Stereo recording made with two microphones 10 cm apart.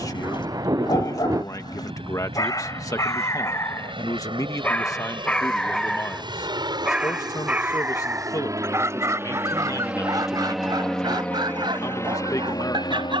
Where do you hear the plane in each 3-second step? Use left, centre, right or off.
right, right, right, centre, left.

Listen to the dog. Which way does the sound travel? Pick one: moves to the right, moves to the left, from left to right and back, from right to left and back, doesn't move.
moves to the right.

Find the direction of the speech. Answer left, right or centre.
left.